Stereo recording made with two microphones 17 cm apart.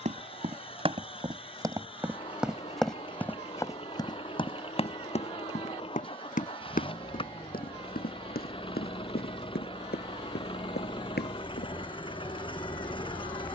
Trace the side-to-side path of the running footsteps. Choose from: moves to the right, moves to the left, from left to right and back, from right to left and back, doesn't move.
moves to the left.